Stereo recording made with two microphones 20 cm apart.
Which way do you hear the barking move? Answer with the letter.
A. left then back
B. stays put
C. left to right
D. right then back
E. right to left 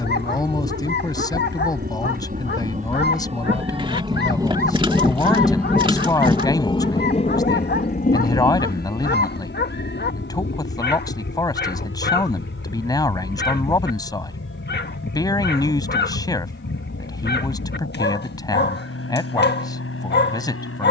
B.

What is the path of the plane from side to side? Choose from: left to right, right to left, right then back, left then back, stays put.
right to left.